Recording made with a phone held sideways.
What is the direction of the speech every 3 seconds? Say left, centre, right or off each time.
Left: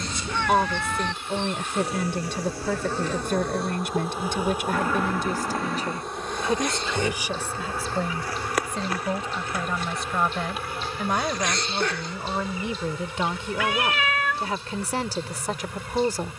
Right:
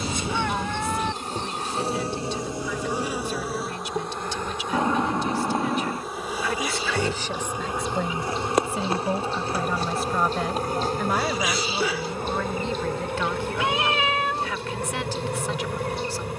left, left, centre, centre, left, left.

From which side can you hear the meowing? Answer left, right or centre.
right.